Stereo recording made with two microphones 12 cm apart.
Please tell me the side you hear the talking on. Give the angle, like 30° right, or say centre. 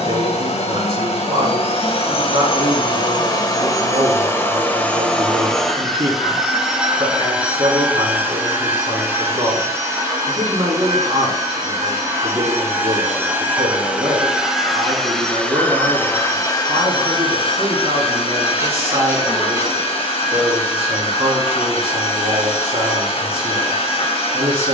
60° right.